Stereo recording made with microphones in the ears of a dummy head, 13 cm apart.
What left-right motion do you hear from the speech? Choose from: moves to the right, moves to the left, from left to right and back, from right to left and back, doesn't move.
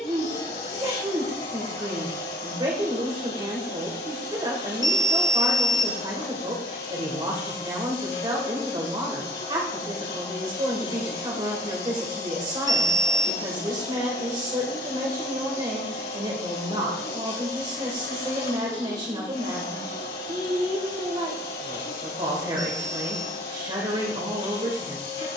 doesn't move.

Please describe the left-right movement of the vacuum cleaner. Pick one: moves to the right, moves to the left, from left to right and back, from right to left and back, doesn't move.
doesn't move.